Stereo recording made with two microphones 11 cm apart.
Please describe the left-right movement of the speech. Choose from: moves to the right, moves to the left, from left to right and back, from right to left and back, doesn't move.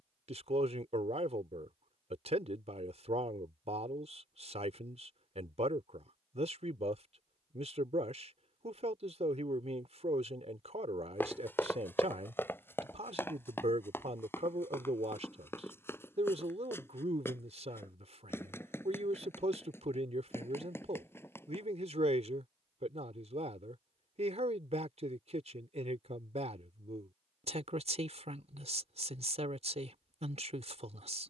doesn't move.